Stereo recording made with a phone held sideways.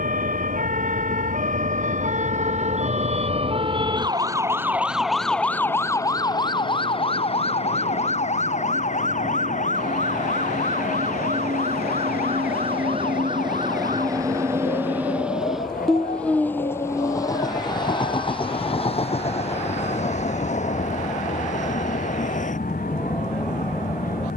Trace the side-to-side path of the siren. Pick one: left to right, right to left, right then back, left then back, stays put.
right to left.